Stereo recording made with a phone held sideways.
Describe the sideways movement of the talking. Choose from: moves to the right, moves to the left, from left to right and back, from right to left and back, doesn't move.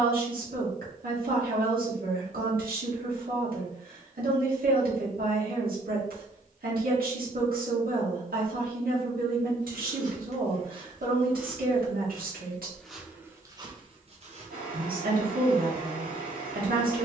doesn't move.